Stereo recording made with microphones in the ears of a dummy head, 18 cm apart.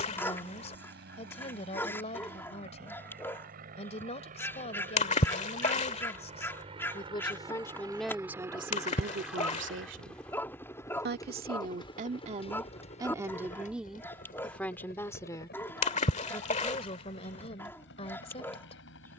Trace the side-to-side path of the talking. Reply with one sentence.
In this clip you hear the talking go right and come back.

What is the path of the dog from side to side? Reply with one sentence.
You can hear the dog stay put.